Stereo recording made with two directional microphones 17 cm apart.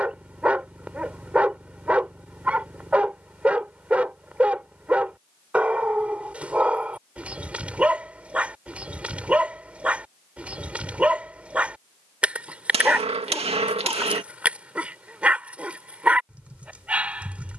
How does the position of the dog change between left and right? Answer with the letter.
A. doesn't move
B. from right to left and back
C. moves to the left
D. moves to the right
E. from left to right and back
A.